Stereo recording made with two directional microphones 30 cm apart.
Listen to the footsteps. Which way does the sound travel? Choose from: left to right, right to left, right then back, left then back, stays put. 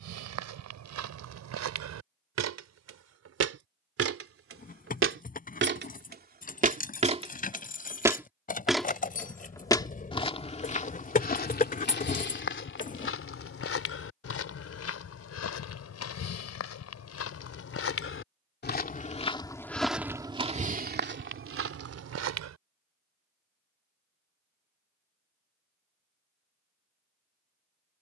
left then back.